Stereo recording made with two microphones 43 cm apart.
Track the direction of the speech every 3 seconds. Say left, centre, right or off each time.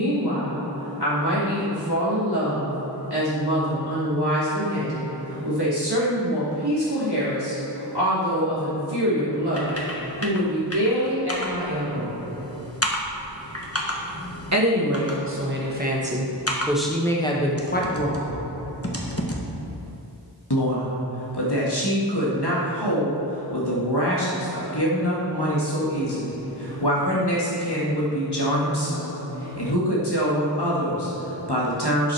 right, right, right, right, right, centre, left, left, left, left, left.